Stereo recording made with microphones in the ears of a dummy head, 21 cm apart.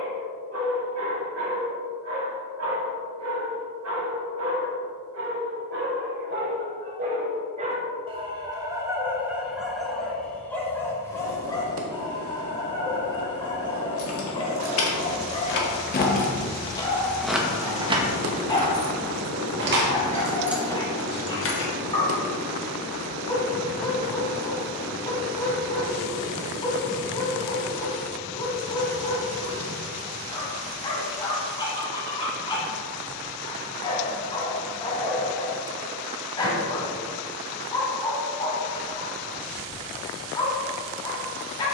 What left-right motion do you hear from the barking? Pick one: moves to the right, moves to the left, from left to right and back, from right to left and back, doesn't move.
moves to the left.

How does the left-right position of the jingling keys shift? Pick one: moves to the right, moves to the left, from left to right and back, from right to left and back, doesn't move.
from left to right and back.